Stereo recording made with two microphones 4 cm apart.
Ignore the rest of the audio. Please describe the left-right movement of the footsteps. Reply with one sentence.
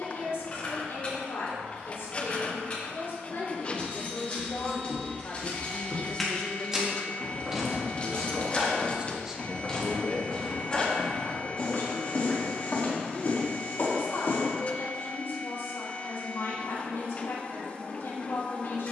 In this clip you hear the footsteps go right and come back.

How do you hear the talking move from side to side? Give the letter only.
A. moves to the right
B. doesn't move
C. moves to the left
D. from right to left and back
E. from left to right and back
E.